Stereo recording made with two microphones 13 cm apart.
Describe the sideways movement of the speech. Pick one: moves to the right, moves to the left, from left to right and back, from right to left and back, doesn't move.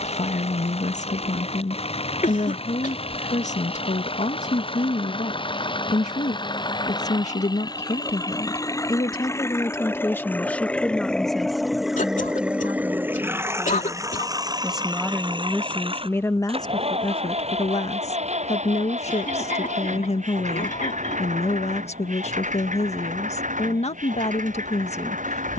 from left to right and back.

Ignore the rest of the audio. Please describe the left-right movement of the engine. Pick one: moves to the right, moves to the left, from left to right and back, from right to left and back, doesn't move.
moves to the right.